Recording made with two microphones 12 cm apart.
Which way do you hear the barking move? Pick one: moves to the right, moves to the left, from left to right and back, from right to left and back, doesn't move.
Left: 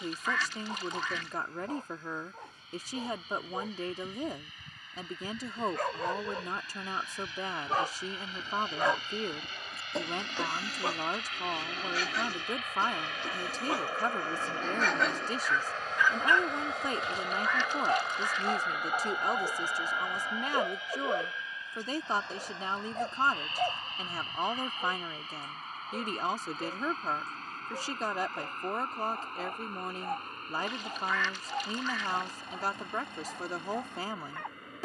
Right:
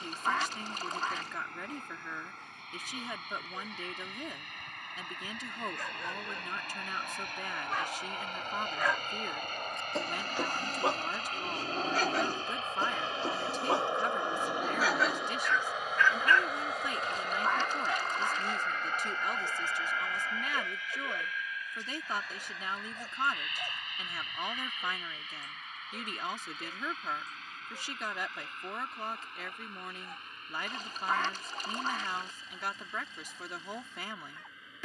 from left to right and back.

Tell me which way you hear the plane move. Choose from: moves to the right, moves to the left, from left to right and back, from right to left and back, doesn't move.
moves to the left.